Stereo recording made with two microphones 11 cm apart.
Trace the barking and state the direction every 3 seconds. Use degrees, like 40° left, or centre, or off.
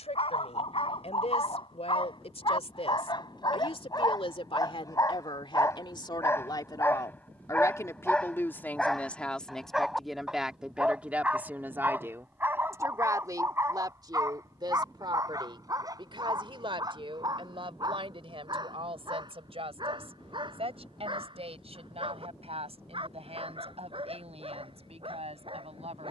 50° left, 30° left, 10° left, 10° right, 20° right, 30° right, 40° right, 50° right, 50° right.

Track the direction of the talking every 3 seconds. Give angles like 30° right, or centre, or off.
70° left, 50° left, 30° left, centre, 30° right, 50° right, 60° right, 60° right, 60° right.